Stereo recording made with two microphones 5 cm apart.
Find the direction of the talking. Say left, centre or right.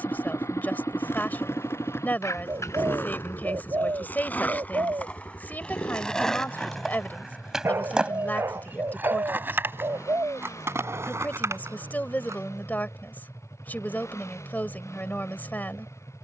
left.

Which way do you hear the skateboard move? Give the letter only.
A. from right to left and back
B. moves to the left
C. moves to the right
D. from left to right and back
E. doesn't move
C.